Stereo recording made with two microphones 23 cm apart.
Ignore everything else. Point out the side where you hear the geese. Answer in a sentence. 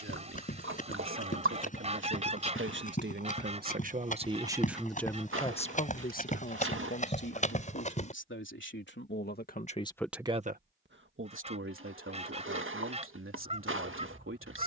In this clip you hear the geese on the right.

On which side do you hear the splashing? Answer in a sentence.
In this clip you hear the splashing on the right.